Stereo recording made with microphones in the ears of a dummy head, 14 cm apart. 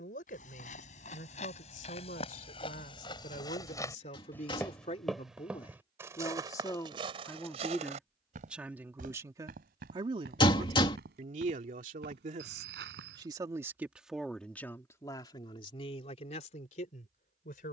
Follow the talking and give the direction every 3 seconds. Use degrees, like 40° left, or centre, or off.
50° left, 40° left, 10° left, 40° right, 20° right, 40° left.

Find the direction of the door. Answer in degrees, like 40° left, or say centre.
30° left.